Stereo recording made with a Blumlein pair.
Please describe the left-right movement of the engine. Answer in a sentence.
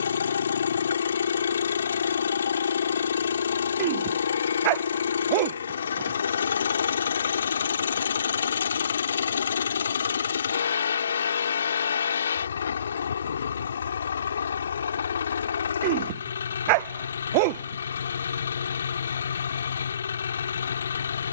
You can hear the engine stay in one place.